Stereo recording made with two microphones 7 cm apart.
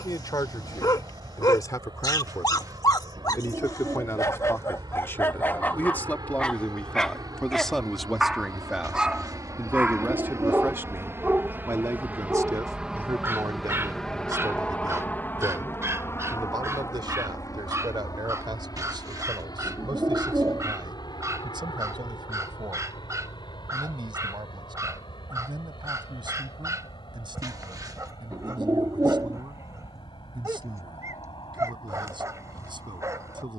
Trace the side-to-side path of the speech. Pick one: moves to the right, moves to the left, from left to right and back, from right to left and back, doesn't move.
moves to the right.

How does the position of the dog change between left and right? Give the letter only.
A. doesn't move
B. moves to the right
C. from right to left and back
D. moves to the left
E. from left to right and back
B.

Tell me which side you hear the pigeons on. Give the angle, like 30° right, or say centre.
50° right.